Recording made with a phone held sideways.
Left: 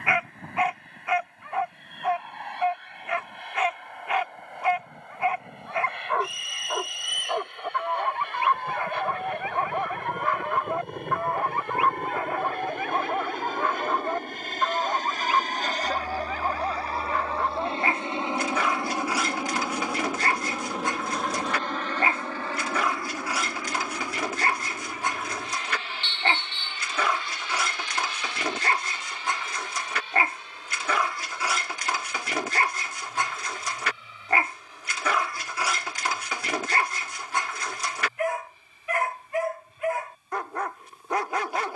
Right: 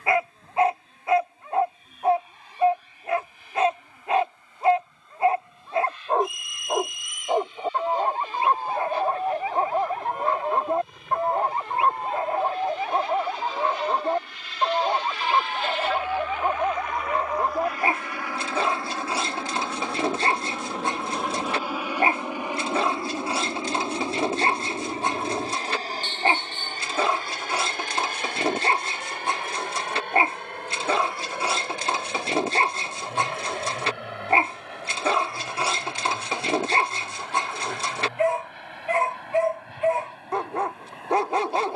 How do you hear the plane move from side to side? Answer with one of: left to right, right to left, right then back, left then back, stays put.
left to right.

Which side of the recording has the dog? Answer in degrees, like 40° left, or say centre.
30° right.